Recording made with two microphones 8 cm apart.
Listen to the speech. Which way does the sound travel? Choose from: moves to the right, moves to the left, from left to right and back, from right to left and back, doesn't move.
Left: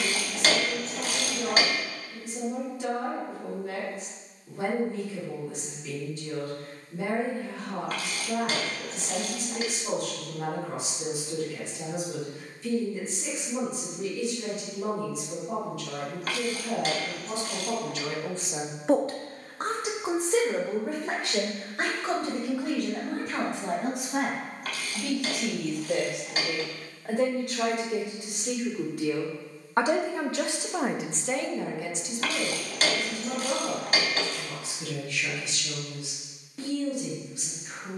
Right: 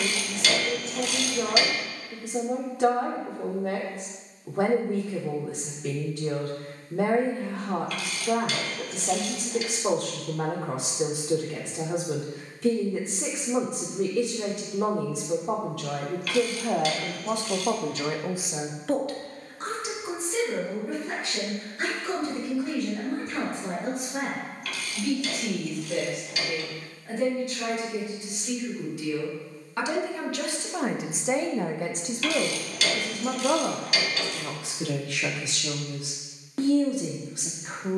from right to left and back.